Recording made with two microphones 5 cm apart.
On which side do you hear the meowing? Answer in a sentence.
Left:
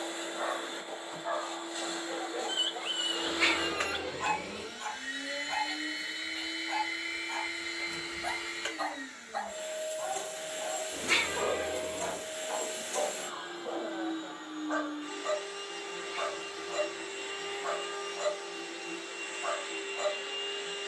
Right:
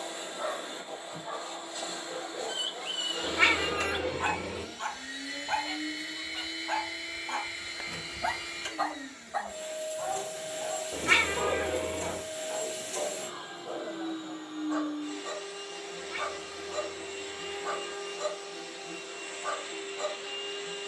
In this clip you hear the meowing on the right.